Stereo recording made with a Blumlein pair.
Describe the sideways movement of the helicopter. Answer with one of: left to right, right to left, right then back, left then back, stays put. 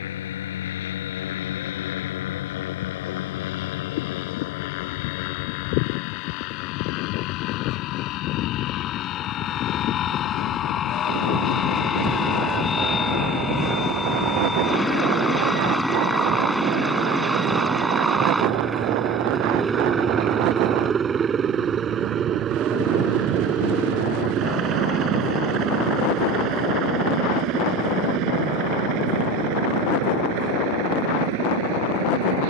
left to right.